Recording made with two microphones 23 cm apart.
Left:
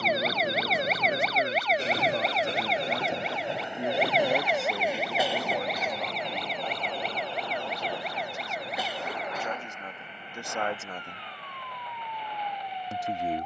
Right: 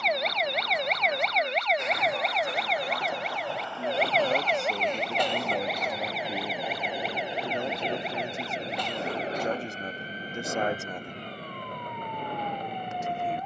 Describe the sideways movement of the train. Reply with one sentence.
In this clip you hear the train travel towards the right.